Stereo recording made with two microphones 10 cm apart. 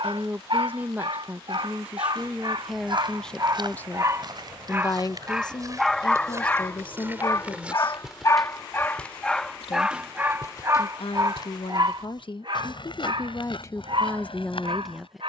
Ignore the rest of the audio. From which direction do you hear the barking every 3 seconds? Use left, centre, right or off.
right, right, left, right, right.